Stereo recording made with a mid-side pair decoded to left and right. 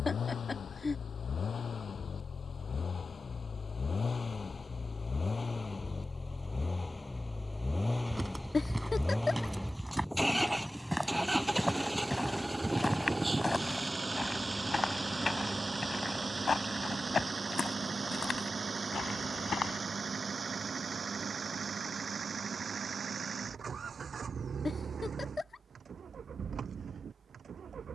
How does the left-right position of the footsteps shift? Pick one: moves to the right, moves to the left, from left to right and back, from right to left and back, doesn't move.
moves to the left.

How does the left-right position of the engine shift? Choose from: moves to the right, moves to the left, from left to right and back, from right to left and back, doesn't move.
moves to the right.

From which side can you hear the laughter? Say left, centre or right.
left.